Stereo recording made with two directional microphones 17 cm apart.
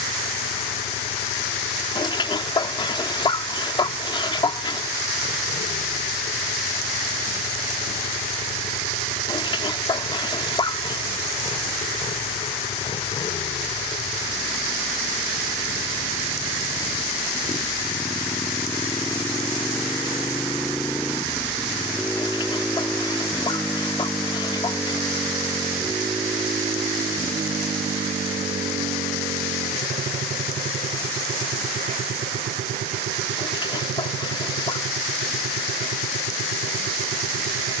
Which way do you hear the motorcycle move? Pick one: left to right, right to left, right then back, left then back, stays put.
left to right.